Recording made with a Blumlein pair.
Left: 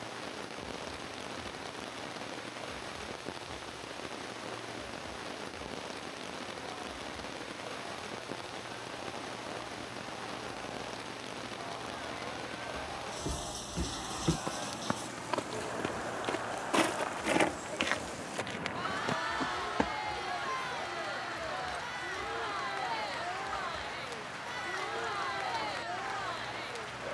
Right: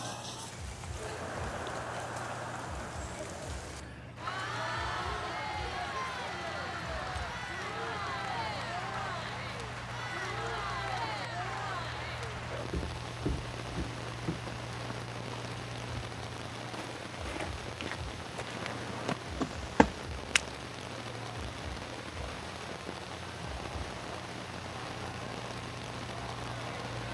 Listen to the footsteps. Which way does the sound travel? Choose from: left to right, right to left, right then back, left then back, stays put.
left then back.